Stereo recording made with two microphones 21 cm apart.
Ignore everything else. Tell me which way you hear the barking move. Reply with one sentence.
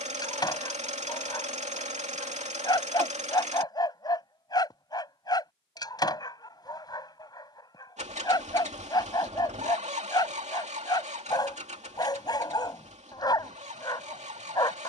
In this clip you hear the barking stay in one place.